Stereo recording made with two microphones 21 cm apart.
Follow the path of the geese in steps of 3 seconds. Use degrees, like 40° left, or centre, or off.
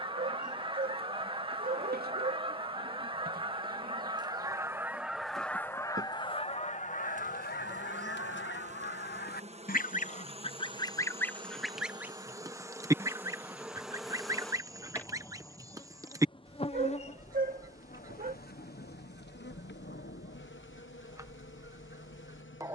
20° right, 10° right, 40° left, 20° left, 20° right, 20° right, 20° right, 20° right.